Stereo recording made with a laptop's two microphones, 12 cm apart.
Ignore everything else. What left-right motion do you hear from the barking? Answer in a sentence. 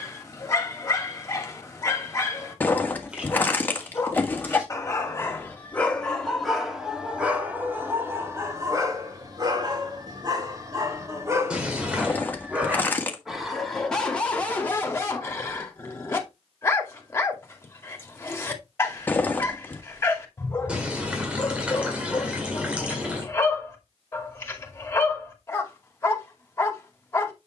In this clip you hear the barking move from left to right and back again.